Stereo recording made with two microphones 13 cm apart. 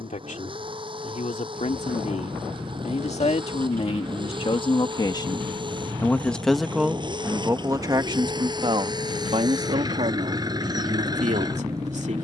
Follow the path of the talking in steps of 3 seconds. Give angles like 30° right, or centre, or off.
60° left, 40° left, 20° right, 60° right.